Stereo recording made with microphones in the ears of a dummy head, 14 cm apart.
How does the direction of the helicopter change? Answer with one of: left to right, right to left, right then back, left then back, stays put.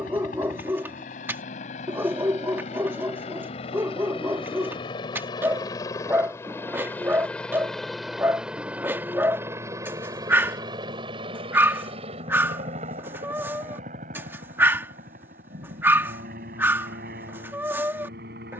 left to right.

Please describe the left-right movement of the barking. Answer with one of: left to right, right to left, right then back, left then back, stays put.
stays put.